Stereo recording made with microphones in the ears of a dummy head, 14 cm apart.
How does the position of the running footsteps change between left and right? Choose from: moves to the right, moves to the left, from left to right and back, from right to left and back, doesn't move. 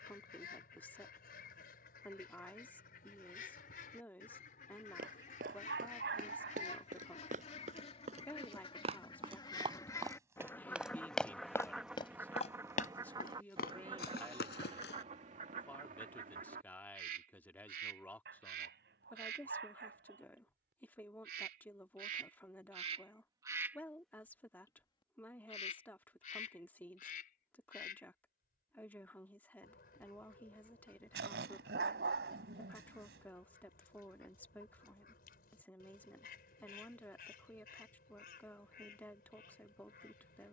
moves to the left.